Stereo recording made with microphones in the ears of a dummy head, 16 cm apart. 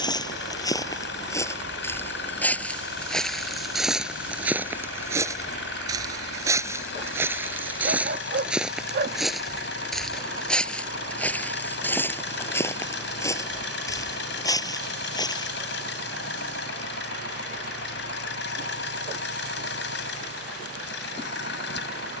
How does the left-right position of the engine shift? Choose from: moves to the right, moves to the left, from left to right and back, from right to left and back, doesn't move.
doesn't move.